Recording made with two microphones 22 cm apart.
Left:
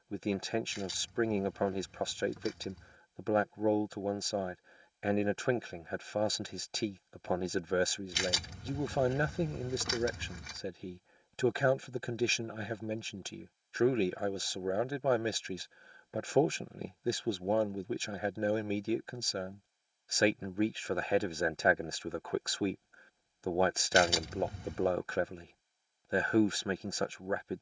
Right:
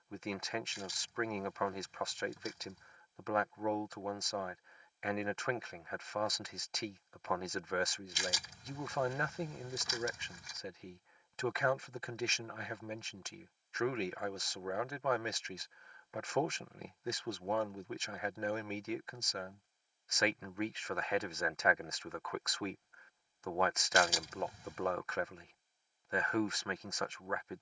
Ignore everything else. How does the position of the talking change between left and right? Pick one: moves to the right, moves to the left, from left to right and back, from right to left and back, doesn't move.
doesn't move.